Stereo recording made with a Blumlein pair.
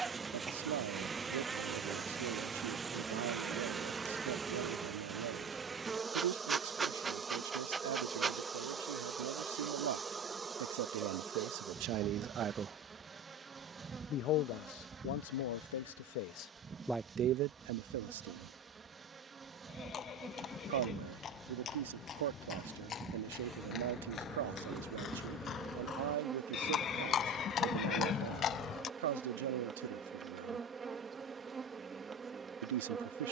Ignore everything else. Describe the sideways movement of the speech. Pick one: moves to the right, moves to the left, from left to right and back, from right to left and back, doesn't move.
from right to left and back.